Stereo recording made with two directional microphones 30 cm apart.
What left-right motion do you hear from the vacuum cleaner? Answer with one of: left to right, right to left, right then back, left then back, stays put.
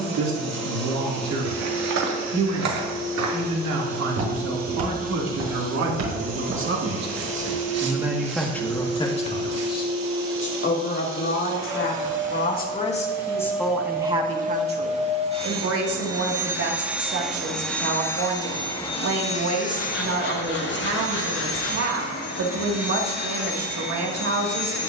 right to left.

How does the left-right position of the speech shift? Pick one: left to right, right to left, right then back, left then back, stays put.
left then back.